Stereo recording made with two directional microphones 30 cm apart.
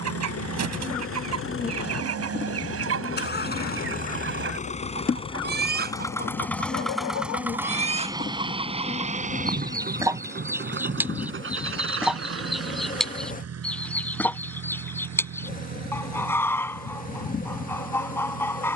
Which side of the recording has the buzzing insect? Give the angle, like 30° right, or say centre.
30° left.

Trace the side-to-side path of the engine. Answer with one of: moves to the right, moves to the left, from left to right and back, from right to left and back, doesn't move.
moves to the right.